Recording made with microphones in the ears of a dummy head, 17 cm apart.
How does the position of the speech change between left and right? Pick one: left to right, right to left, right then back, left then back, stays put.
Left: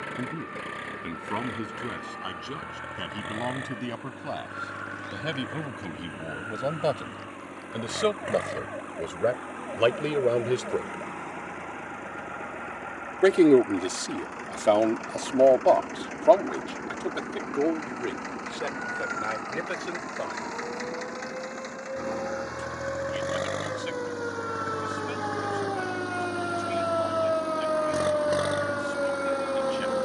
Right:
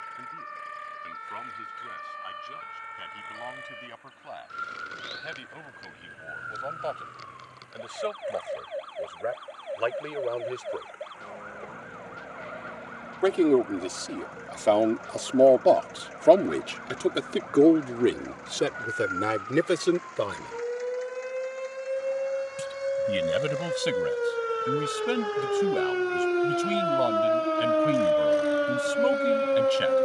left to right.